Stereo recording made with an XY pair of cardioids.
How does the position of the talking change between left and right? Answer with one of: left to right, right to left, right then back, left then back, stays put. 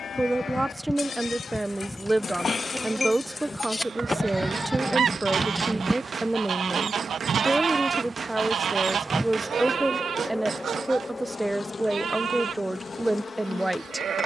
stays put.